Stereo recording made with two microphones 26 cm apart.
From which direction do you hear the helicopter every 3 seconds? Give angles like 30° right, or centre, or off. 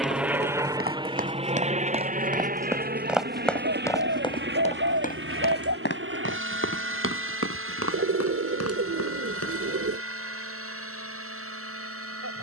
20° right, 40° right, 50° right, 50° right.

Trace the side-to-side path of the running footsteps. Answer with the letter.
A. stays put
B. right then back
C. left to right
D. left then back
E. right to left
E.